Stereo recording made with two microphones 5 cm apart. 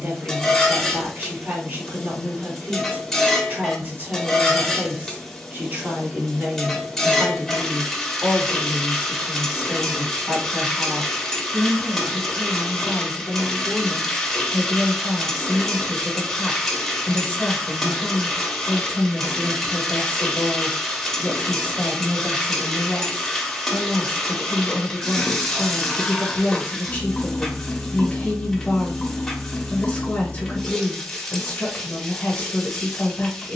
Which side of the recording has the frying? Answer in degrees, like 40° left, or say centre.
10° left.